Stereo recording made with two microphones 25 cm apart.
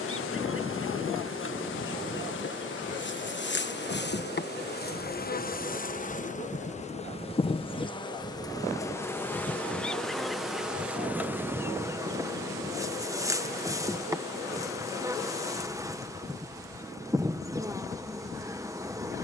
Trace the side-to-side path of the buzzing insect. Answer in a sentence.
In this clip you hear the buzzing insect move from left to right.